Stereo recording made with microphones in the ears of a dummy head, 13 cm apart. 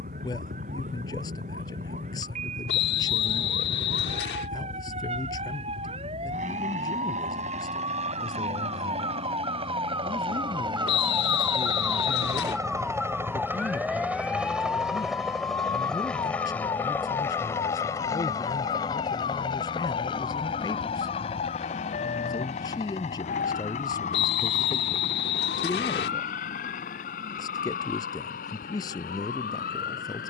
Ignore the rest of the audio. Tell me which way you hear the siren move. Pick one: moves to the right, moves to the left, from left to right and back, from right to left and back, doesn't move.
moves to the left.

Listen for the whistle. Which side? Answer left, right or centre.
left.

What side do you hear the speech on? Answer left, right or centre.
left.